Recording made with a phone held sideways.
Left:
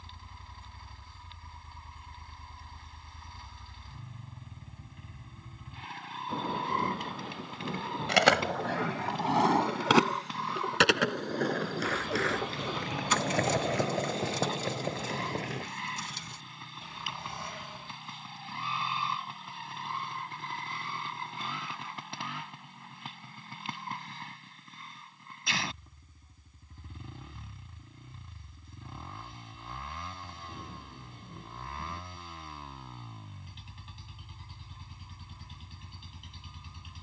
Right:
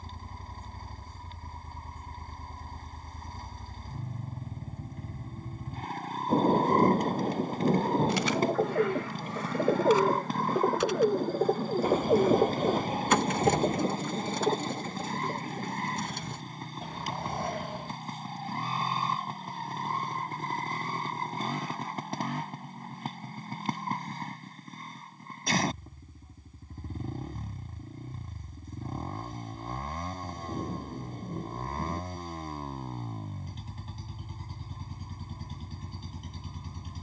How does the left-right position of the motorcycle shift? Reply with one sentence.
In this clip you hear the motorcycle stay in one place.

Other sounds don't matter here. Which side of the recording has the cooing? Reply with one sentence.
In this clip you hear the cooing on the right.